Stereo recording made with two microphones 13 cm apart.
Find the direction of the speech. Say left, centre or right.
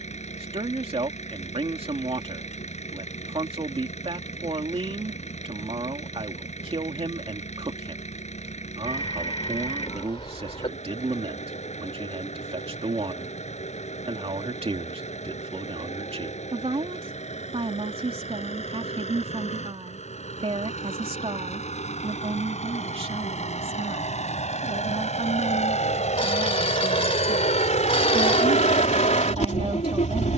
right.